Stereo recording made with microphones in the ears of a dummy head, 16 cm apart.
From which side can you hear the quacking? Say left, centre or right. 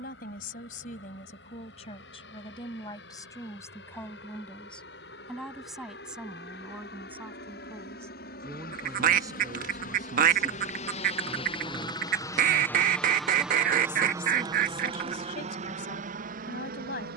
right.